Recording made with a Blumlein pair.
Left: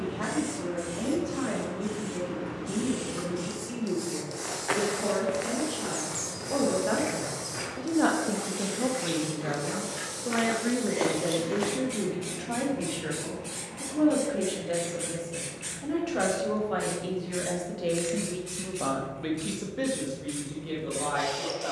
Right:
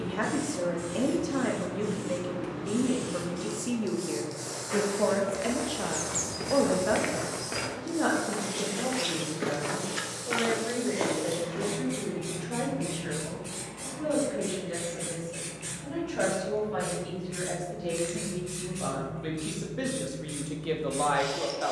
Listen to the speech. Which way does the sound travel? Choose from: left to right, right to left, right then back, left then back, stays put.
left then back.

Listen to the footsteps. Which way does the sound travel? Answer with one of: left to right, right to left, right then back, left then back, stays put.
right then back.